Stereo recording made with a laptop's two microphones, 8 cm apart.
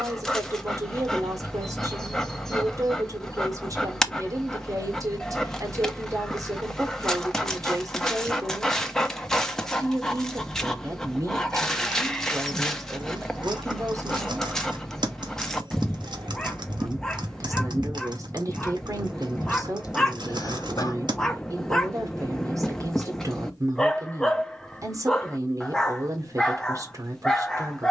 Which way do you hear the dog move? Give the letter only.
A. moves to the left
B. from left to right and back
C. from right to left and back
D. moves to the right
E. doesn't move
E.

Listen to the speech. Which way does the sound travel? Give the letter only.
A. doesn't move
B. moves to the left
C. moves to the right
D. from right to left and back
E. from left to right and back
A.